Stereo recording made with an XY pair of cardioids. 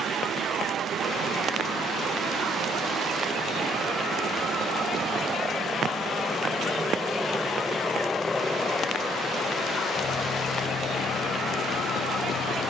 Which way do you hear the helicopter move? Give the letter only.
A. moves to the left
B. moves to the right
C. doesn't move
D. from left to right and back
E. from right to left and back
A.